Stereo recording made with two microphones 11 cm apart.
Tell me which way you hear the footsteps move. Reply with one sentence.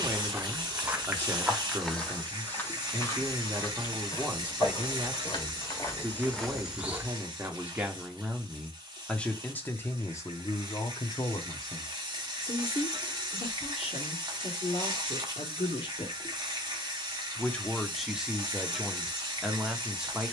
You can hear the footsteps move from right to left and back again.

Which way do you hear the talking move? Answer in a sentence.
In this clip you hear the talking go left and come back.